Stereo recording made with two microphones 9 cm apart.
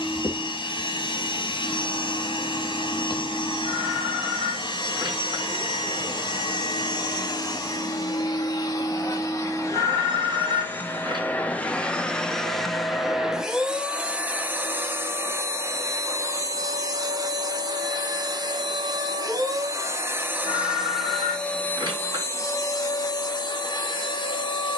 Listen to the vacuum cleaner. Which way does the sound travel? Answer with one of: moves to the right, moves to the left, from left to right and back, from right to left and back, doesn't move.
from left to right and back.